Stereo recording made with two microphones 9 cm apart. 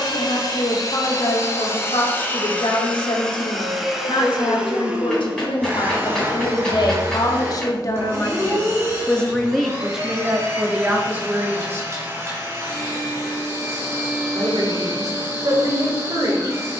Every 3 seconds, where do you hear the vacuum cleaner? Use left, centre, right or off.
left, centre, right, right, right, right.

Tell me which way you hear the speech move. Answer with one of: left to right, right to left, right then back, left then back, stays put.
left to right.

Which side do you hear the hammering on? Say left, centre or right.
centre.